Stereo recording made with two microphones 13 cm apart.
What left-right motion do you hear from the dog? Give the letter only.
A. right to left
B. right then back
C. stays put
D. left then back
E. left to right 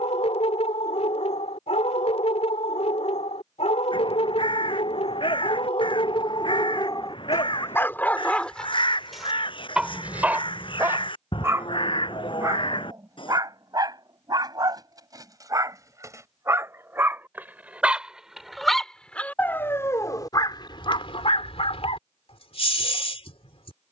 B.